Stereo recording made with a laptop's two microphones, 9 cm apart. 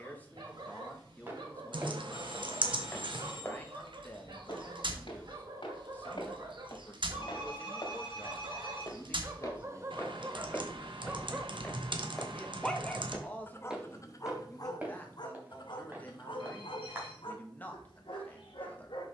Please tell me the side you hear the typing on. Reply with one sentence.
You can hear the typing on the right.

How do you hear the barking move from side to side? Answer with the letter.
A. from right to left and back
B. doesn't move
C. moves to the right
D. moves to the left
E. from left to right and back
D.